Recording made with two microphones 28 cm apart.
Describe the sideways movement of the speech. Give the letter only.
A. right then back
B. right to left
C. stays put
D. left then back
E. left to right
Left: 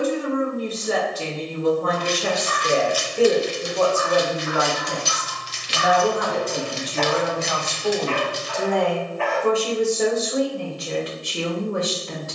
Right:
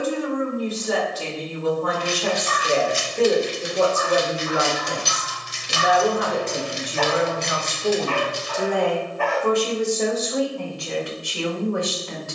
A.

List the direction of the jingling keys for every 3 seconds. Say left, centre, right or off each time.
centre, right, centre, off.